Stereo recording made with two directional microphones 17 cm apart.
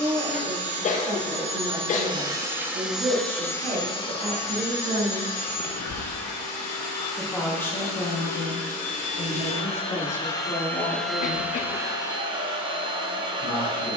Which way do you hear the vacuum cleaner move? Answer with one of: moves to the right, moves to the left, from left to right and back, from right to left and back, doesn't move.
from right to left and back.